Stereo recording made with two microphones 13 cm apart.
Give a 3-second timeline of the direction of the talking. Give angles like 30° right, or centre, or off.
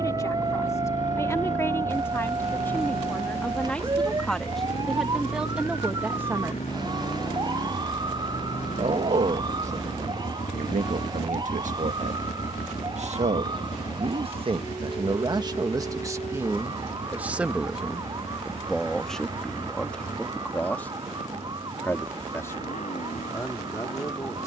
20° left, centre, 30° right, 70° right, 50° right, 20° right, 10° left, 20° left.